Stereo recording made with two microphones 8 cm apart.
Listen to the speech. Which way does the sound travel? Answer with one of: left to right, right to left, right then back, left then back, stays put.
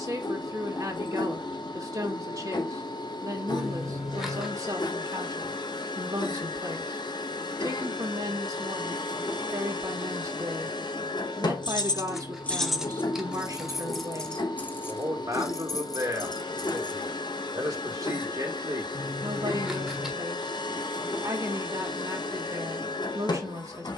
stays put.